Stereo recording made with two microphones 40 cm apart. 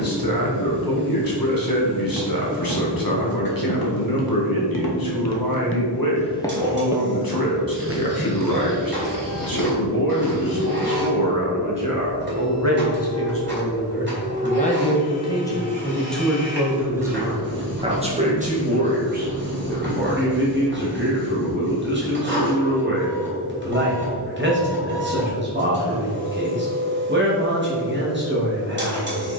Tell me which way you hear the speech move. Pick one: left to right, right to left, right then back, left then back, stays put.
left to right.